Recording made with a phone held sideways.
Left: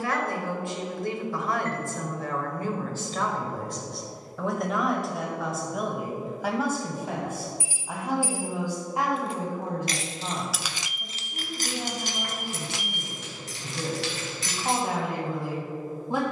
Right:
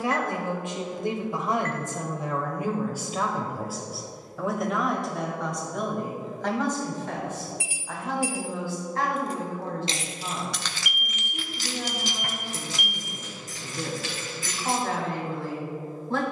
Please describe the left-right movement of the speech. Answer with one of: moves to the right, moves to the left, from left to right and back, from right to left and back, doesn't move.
moves to the left.